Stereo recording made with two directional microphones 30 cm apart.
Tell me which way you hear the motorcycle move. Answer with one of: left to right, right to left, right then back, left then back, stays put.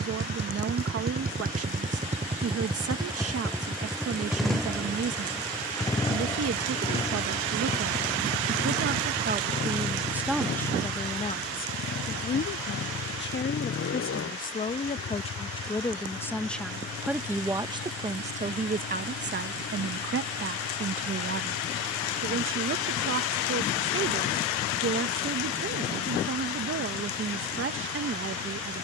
right to left.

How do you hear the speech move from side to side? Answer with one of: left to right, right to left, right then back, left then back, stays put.
left then back.